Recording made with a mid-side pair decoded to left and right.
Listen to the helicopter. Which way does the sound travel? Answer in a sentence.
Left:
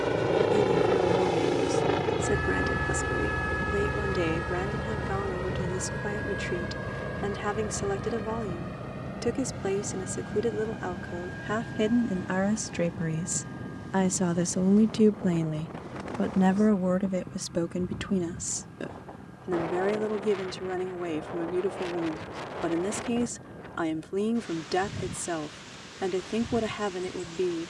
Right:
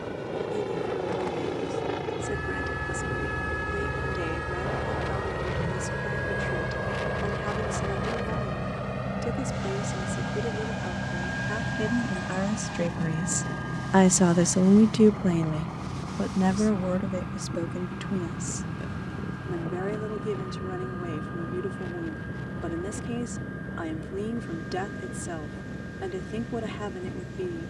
You can hear the helicopter travel towards the right.